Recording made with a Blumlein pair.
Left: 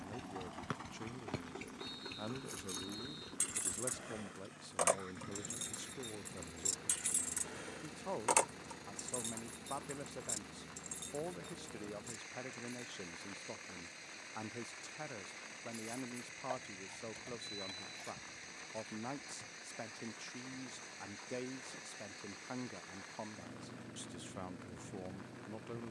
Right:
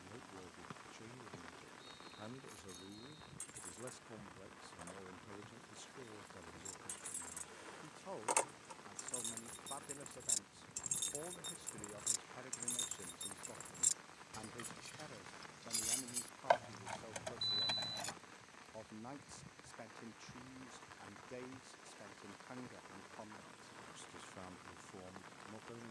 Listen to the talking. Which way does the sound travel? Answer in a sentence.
In this clip you hear the talking stay in one place.